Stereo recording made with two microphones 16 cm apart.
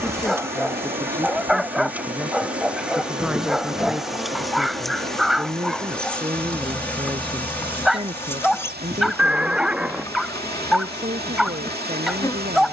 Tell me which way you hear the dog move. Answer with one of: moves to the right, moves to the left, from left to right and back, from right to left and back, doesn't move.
doesn't move.